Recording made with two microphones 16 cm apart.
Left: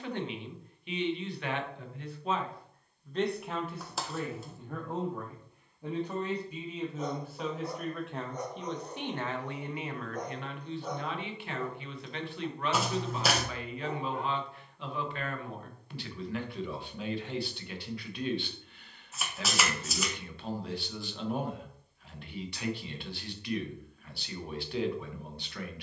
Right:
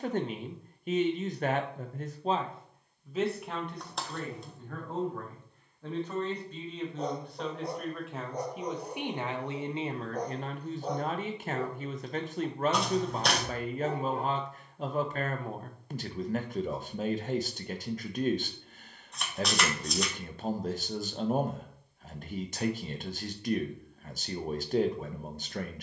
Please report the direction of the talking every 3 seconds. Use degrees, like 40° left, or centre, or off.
40° right, 10° left, centre, 30° right, 40° right, 40° right, 40° right, 40° right, 40° right.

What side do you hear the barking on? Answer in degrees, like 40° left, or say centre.
30° right.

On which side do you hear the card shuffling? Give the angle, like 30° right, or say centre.
centre.